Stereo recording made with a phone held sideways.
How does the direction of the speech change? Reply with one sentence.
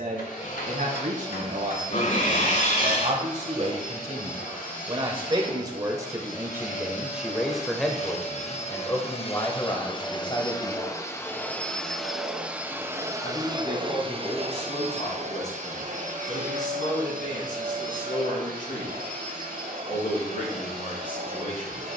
In this clip you hear the speech move from right to left.